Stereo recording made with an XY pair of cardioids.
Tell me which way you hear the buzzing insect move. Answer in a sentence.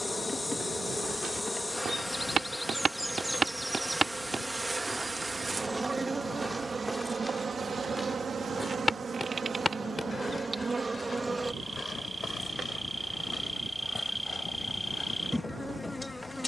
You can hear the buzzing insect go right and come back.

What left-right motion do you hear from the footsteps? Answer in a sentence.
You can hear the footsteps move to the left.